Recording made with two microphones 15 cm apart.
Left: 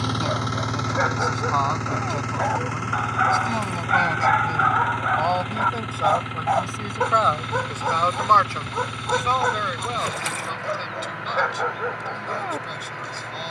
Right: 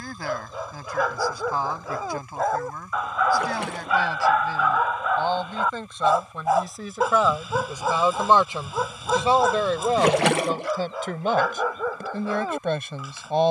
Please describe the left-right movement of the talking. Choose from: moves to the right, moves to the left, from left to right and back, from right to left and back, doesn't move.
moves to the right.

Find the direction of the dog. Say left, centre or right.
centre.